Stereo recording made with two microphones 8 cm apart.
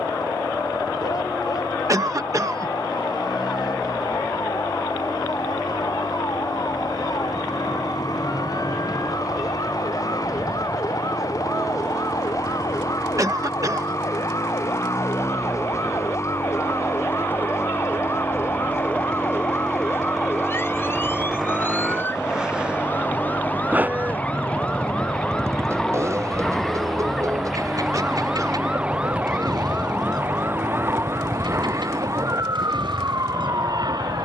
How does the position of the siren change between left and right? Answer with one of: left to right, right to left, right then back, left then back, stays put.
left to right.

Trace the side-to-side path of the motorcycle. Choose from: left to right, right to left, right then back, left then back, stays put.
left to right.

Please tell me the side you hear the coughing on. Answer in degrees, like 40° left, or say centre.
40° right.